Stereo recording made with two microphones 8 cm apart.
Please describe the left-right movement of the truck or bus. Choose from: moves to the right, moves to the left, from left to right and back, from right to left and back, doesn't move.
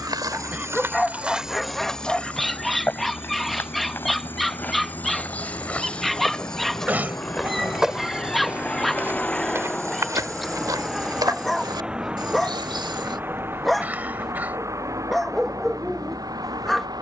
moves to the right.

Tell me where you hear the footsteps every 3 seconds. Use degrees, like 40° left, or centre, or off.
10° right, 20° left, centre, 50° right, 80° right, off.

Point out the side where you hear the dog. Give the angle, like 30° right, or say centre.
centre.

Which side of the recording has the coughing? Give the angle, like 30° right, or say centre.
20° right.